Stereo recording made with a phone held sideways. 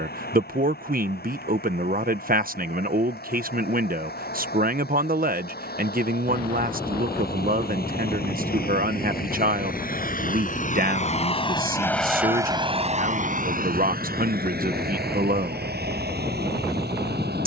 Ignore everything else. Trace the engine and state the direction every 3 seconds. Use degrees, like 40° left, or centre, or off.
80° left, 80° left, 70° left, 50° left, 50° right, 80° right.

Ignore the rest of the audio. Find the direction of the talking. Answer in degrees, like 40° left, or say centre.
60° right.